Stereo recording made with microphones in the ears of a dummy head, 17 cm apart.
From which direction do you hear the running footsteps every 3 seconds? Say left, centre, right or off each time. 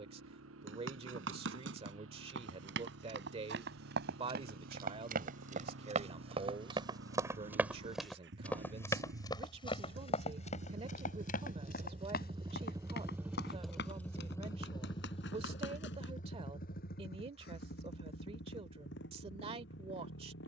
right, right, centre, left, left, left, off.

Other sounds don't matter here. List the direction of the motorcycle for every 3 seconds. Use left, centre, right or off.
right, right, right, right, centre, left, left.